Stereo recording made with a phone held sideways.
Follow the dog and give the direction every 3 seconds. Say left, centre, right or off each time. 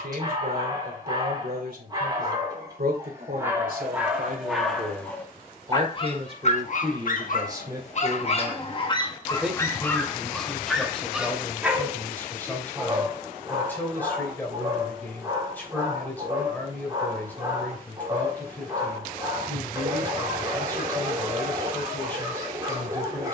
right, centre, left, centre, right, right, right, right.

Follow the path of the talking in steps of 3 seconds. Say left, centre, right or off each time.
right, right, right, centre, centre, centre, centre, centre.